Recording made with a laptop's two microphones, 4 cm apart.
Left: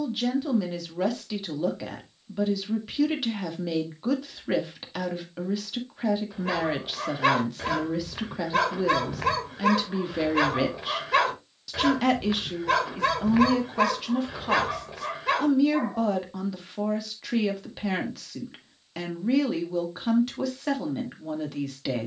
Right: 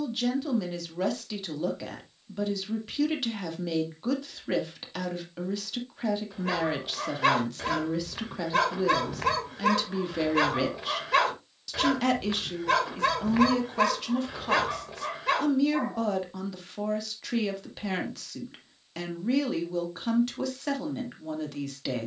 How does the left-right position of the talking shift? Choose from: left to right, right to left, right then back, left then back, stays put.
stays put.